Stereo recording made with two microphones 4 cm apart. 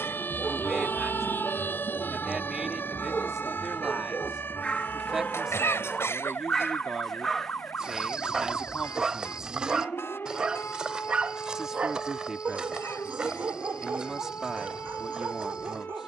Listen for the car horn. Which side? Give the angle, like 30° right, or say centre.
60° left.